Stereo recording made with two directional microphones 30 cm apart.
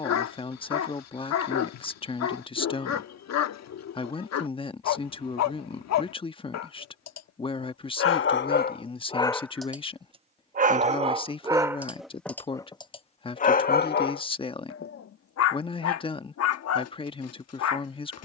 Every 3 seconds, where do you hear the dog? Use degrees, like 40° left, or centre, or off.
60° left, 60° left, 50° left, 10° right, 30° left, 50° left.